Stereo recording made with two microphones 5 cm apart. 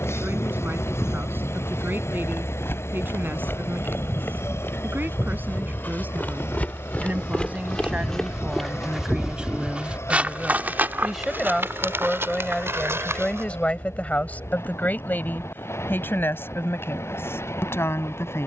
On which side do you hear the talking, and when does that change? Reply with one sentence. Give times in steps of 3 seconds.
In this clip you hear the talking on the right from 0 s, in the centre from 9 s and on the left from 12 s.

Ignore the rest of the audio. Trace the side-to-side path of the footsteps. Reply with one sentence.
You can hear the footsteps move from left to right.